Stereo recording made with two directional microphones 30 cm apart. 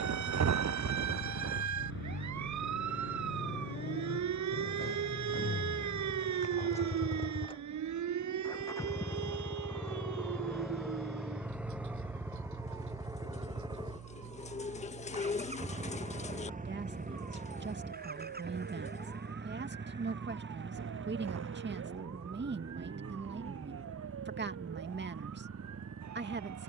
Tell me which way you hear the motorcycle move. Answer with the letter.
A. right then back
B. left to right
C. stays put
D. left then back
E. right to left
B.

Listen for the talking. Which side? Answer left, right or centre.
right.